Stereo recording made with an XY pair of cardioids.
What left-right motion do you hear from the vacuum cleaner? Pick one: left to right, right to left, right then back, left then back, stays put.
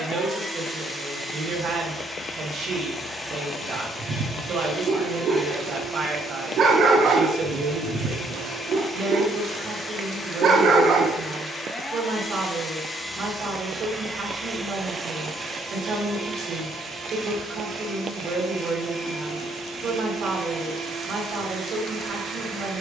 left to right.